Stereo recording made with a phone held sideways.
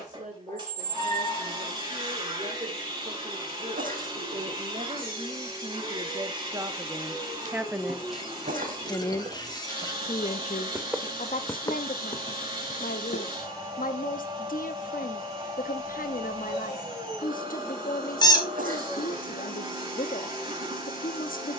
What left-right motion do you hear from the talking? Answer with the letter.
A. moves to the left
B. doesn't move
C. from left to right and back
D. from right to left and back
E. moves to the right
A.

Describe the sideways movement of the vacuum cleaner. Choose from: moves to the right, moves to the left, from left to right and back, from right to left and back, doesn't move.
doesn't move.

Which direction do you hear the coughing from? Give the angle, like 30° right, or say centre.
60° right.